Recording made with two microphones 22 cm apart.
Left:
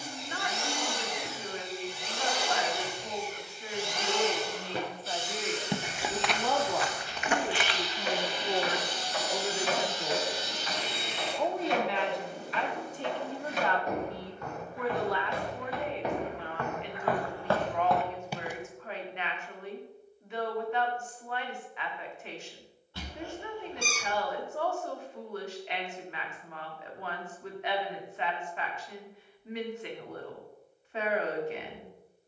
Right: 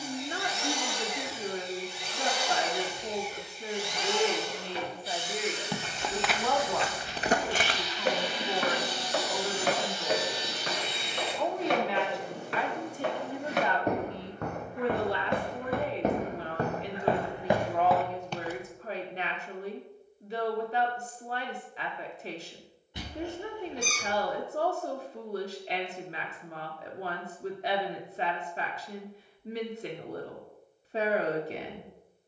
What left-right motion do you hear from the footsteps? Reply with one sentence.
You can hear the footsteps go right and come back.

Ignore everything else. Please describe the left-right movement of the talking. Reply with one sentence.
In this clip you hear the talking move from right to left and back again.